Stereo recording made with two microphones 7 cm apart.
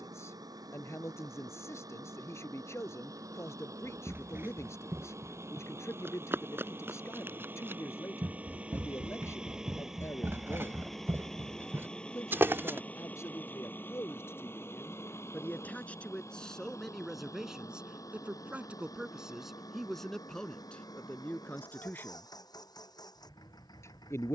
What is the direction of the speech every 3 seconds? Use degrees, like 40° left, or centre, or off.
40° left, 40° left, 40° left, 40° left, 40° left, 10° left, centre, 30° left.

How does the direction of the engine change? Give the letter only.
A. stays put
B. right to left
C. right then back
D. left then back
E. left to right
B.